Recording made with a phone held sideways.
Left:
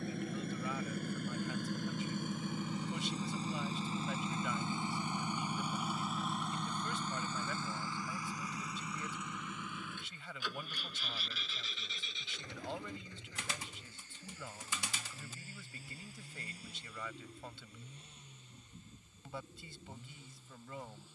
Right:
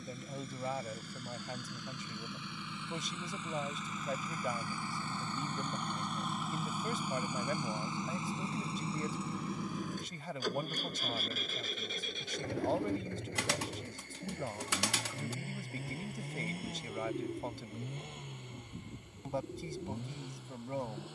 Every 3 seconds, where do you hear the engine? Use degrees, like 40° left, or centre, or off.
50° left, 20° left, 10° right, 40° right, 60° right, 60° right, 70° right.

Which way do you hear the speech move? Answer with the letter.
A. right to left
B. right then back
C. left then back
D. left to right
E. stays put
E.